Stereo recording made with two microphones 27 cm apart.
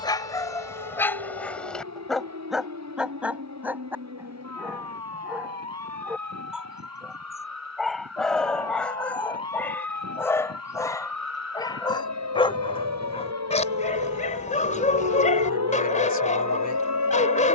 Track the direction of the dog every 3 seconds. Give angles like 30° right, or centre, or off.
10° left, 10° right, centre, 10° left, 20° left, 30° left.